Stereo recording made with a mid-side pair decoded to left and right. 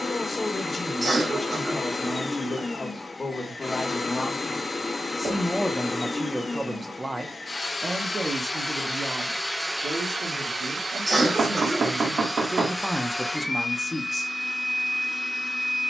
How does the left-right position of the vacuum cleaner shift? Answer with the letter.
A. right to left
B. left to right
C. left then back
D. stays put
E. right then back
E.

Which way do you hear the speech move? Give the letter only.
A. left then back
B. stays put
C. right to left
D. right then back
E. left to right
D.